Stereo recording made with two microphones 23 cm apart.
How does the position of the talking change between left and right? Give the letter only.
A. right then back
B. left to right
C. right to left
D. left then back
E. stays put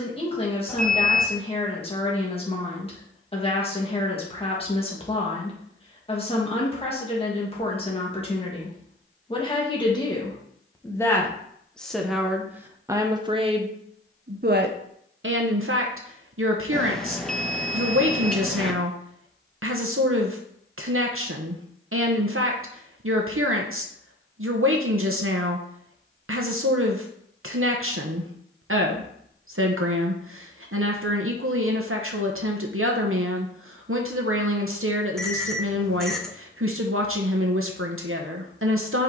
B.